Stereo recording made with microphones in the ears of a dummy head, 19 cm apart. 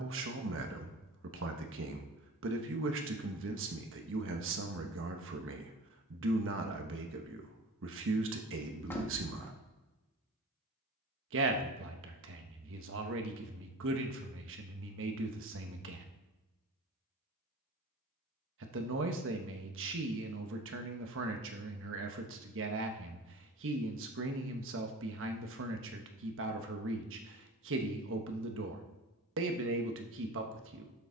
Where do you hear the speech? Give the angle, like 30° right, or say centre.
60° right.